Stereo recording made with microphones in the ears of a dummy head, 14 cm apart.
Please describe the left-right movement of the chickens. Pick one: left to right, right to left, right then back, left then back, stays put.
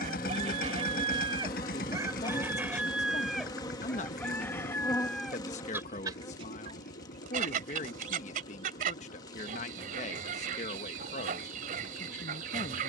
left then back.